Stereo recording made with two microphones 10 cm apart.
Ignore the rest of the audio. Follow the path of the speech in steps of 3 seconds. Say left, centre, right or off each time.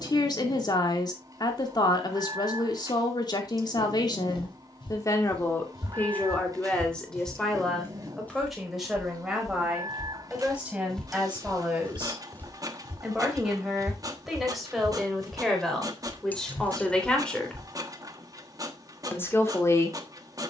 left, left, centre, centre, centre, centre, left.